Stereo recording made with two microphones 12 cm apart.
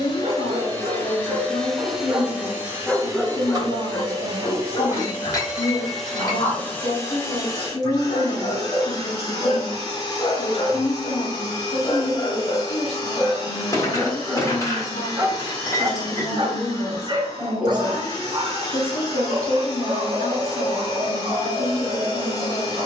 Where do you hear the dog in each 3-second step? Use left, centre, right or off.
right, left, left, left, centre, right, right, right.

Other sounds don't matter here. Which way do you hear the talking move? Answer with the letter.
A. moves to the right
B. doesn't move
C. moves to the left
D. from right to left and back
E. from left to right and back
B.